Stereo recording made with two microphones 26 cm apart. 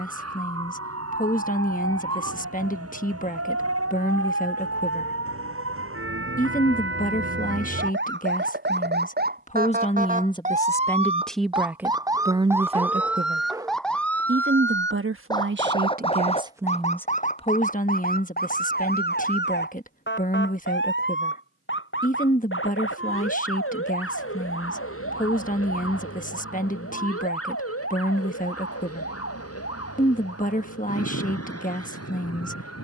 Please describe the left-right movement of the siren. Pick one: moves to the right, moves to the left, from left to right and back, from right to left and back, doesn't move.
moves to the left.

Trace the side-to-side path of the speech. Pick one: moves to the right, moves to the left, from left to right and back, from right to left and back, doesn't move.
from left to right and back.